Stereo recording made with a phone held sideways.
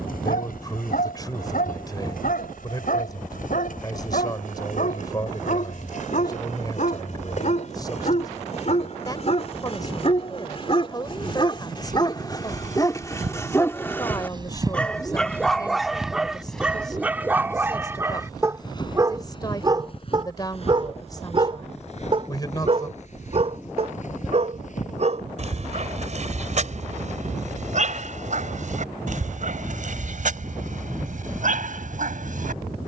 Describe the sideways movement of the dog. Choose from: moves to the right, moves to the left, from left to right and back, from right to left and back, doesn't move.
moves to the right.